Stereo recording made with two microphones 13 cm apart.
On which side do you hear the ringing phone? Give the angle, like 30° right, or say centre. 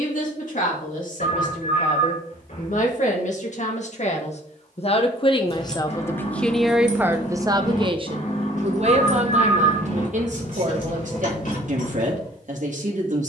70° left.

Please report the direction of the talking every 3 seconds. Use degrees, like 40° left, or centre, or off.
70° left, 50° left, 20° right, 60° right, 70° right.